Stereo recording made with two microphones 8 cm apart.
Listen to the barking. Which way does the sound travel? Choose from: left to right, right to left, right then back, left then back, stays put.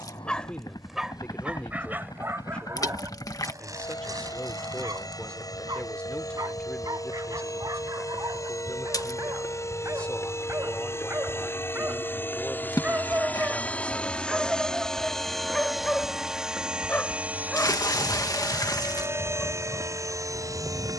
right then back.